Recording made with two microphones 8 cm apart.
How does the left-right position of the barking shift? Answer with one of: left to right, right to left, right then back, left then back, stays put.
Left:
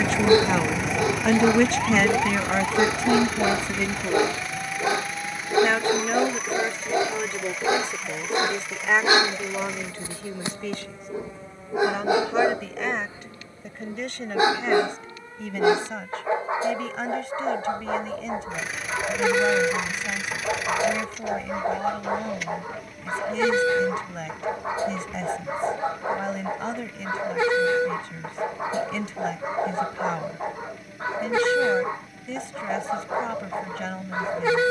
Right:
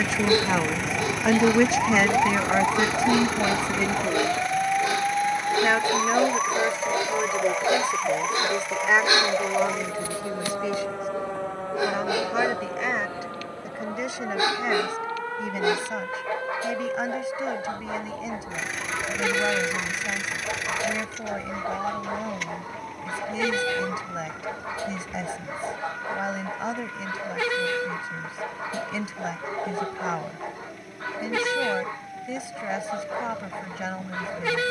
stays put.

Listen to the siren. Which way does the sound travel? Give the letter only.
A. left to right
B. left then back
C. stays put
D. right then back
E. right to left
A.